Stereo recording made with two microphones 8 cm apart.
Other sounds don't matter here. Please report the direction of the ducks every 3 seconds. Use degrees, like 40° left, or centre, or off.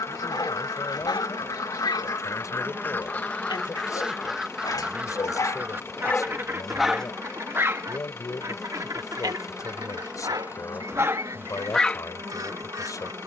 50° left, centre, 40° right, 50° right, 50° right.